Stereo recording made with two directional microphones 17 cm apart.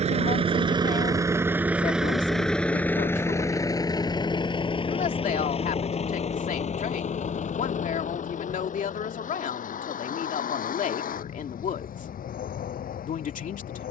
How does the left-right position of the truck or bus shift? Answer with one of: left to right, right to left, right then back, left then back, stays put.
right to left.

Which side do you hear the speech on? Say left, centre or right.
left.